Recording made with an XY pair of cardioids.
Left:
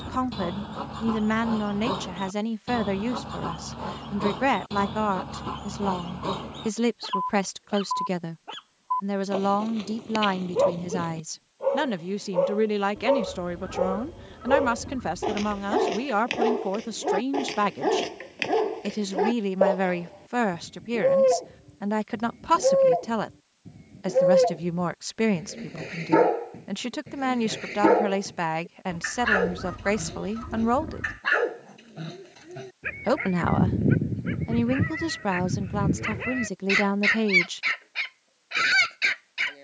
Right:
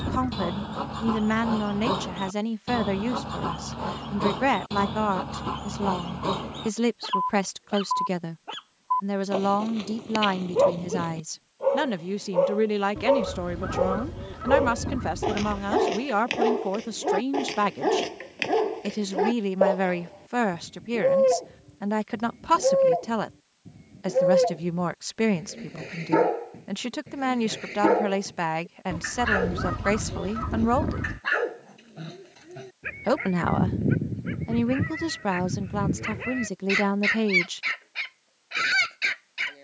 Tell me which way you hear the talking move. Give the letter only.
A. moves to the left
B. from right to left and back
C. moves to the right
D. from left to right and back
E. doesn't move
E.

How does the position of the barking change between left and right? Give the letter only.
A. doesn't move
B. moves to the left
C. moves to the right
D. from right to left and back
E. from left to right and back
B.